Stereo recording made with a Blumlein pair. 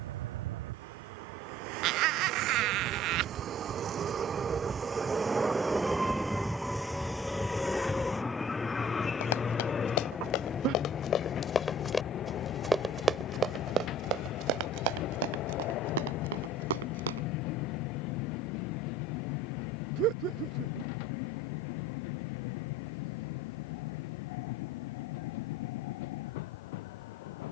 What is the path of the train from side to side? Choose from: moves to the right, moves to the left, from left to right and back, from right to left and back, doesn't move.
moves to the left.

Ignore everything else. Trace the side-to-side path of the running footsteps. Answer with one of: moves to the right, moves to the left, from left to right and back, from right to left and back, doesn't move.
moves to the right.